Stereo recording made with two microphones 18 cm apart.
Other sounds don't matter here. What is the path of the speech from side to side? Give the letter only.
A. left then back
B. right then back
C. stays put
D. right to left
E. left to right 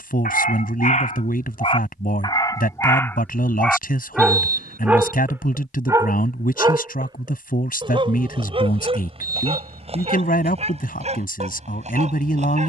C.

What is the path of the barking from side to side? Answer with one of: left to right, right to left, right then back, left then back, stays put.
left to right.